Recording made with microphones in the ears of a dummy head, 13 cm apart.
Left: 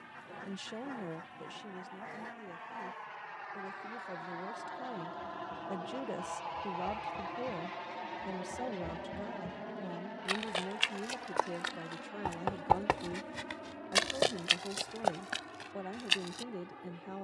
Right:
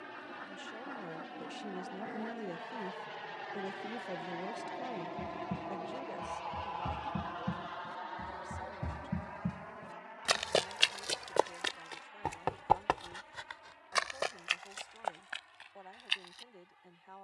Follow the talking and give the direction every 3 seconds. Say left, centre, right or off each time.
centre, centre, left, left, left, left.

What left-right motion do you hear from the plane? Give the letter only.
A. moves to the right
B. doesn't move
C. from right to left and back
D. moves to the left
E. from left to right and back
D.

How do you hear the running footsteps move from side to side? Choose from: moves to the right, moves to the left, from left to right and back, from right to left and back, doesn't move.
moves to the left.